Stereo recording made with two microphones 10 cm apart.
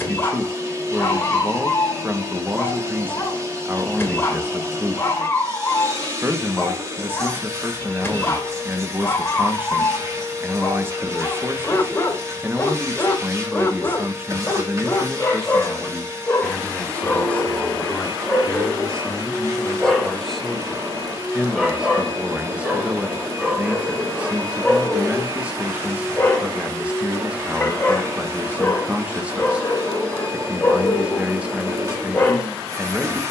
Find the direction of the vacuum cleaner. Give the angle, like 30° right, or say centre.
30° right.